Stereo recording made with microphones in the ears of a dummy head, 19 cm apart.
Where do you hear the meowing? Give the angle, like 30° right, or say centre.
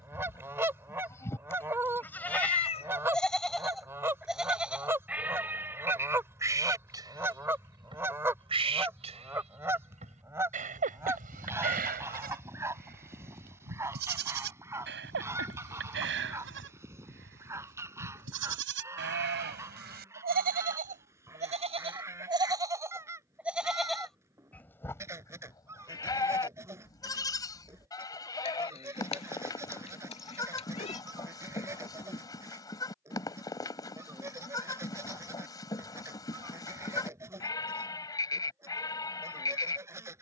30° left.